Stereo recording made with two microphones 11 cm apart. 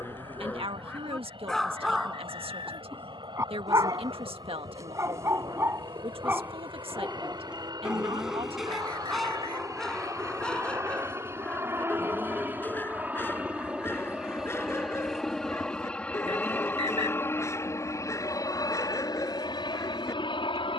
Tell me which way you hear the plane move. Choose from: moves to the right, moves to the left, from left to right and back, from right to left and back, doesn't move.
moves to the left.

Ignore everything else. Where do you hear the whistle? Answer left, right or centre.
right.